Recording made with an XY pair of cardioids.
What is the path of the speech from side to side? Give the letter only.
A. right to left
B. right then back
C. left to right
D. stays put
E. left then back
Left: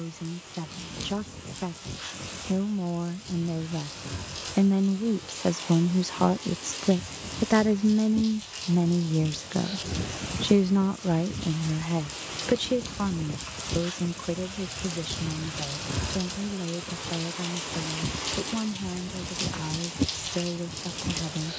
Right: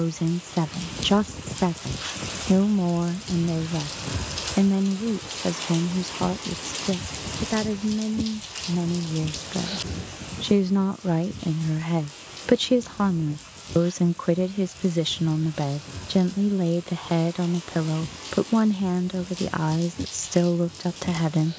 E.